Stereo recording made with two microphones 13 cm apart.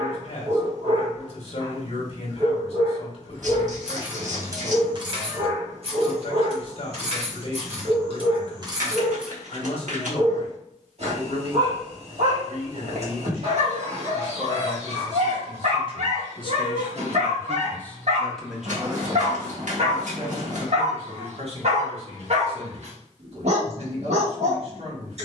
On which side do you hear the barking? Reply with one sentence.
In this clip you hear the barking on the right.